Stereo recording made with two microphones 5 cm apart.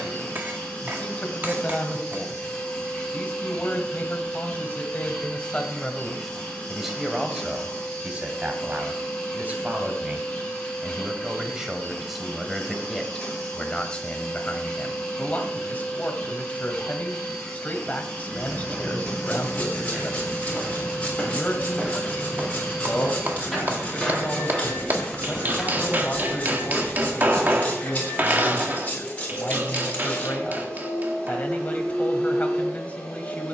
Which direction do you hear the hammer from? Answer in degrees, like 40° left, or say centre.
40° right.